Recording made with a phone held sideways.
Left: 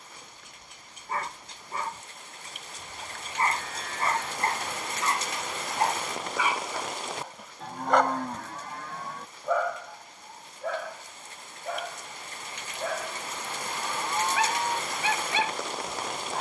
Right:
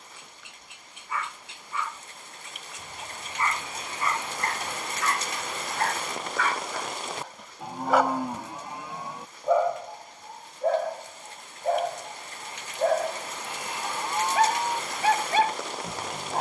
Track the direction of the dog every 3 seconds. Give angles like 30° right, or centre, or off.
40° left, 30° left, centre, 40° right, 50° right, 50° right.